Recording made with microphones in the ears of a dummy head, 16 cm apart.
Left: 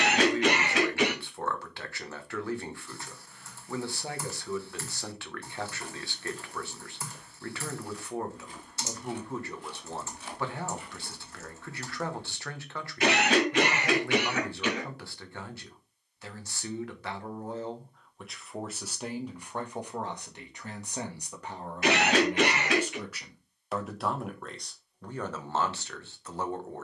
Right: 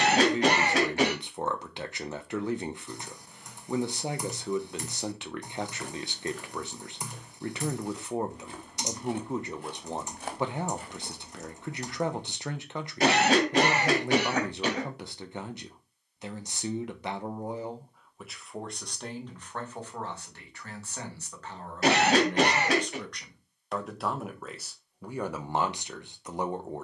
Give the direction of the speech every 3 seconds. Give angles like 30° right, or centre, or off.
20° right, 20° right, 20° right, 20° right, 20° right, 20° right, 10° left, 10° left, 10° right.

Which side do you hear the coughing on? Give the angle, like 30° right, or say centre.
30° right.